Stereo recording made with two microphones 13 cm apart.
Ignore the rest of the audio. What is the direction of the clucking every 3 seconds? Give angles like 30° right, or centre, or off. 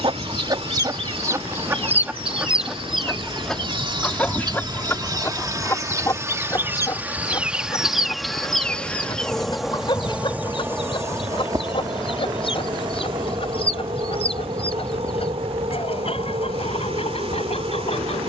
20° right, 10° left, 30° left, 40° left, 50° left, 50° left.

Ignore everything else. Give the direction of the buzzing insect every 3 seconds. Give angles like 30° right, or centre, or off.
50° right, 30° right, 10° right, 10° right, 40° right, 50° right.